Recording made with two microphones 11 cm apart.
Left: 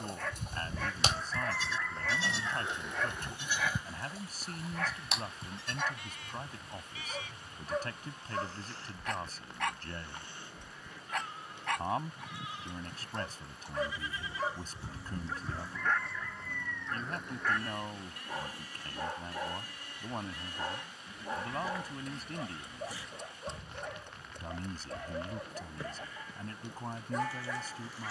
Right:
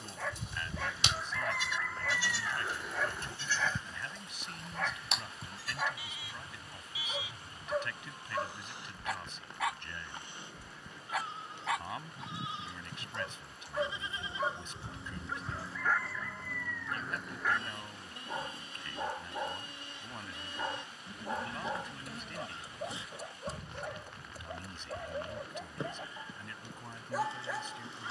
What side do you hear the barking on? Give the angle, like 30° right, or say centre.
10° right.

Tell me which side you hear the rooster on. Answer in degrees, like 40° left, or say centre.
centre.